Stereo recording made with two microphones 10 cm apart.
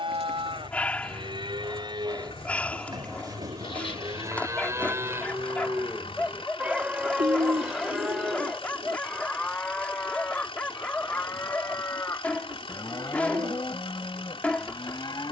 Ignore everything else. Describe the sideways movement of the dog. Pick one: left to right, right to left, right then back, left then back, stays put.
stays put.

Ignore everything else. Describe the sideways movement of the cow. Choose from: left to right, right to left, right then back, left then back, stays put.
right to left.